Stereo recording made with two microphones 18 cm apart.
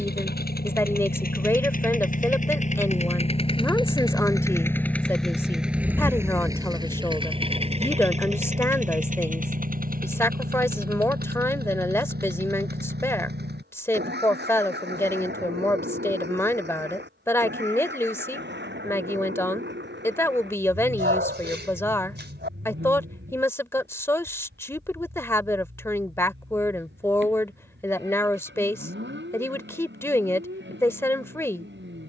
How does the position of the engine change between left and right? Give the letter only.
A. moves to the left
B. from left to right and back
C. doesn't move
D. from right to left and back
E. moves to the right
E.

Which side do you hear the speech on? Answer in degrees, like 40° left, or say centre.
10° left.